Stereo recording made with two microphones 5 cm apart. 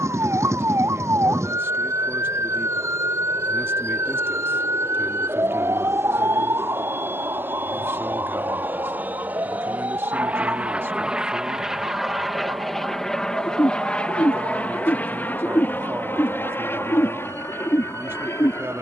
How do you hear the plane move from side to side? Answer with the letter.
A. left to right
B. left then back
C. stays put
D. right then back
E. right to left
E.